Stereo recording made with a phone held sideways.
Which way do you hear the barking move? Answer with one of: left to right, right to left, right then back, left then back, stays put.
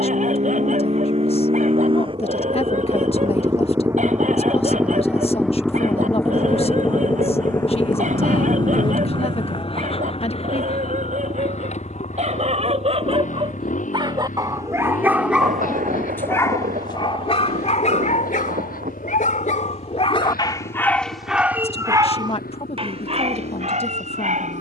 left then back.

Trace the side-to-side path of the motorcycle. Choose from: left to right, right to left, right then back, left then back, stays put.
right to left.